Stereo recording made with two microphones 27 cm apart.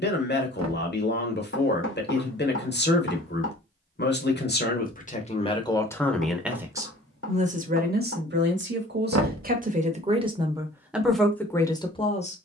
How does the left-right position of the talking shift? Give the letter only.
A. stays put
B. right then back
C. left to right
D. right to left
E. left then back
B.